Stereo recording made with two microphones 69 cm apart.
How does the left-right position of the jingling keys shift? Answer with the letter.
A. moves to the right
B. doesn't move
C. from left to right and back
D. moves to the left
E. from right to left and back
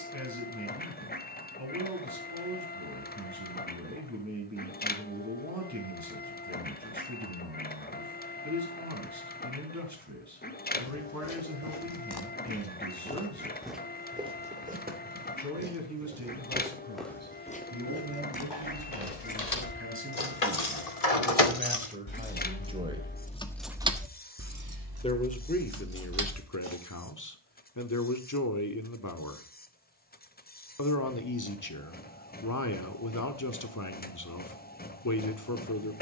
A.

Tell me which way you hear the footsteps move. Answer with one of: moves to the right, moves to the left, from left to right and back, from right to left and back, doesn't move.
from left to right and back.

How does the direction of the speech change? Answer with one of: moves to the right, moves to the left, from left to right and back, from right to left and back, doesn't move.
moves to the left.